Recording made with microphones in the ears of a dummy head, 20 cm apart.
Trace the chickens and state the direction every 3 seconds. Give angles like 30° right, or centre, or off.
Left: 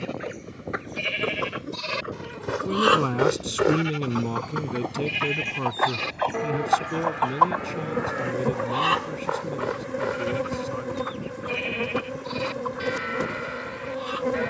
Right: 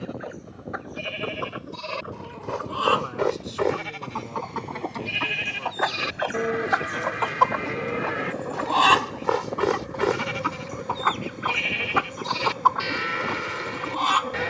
30° left, 10° left, 40° right, 80° right, 80° right.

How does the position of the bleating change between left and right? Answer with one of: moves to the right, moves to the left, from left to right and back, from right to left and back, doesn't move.
moves to the right.